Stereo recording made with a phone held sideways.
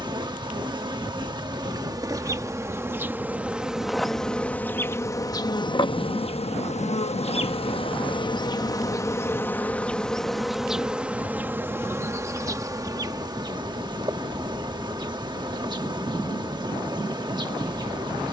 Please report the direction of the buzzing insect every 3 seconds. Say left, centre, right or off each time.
right, centre, left, centre, right, right.